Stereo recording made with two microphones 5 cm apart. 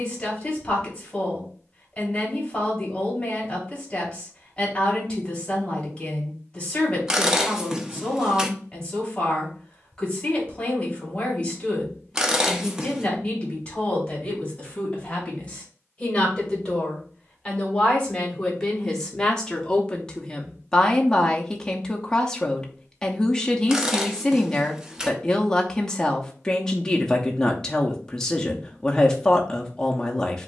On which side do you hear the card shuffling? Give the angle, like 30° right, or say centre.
20° right.